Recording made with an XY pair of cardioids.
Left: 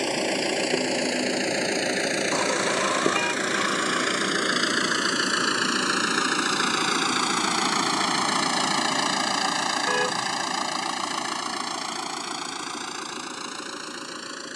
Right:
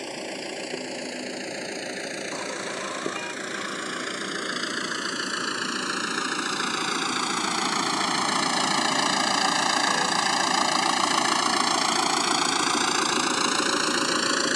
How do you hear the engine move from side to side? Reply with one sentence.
You can hear the engine travel towards the right.